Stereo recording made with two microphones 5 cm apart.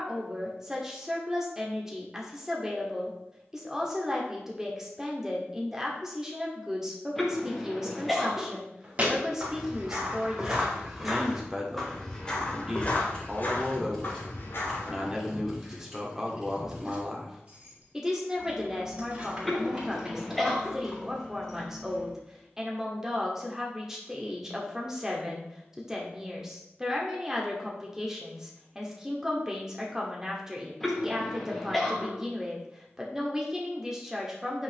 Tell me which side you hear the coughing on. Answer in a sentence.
In this clip you hear the coughing in the centre.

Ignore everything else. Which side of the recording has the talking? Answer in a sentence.
You can hear the talking in the centre.